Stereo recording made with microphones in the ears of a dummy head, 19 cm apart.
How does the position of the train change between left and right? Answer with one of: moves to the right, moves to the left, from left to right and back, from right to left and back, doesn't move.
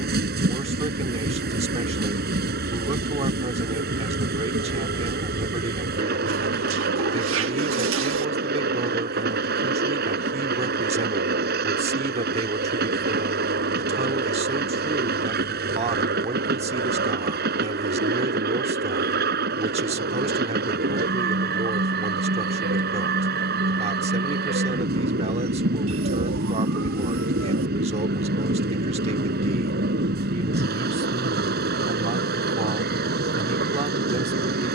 doesn't move.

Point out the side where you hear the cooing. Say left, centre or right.
right.